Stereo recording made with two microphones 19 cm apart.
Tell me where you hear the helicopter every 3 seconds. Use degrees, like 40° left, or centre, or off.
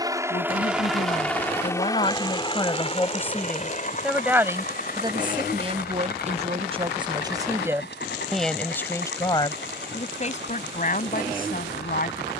10° left, 40° left, 60° left, 60° left.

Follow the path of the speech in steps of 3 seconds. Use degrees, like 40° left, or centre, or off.
40° left, 10° right, 20° right, 40° left.